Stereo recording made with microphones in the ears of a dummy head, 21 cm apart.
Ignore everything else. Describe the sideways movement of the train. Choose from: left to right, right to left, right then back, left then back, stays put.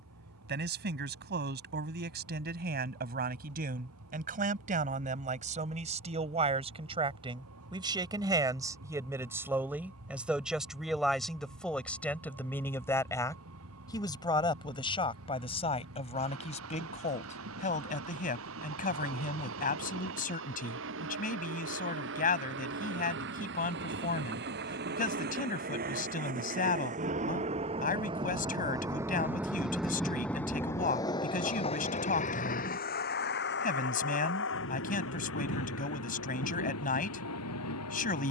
right to left.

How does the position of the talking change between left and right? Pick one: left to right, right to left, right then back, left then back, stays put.
right to left.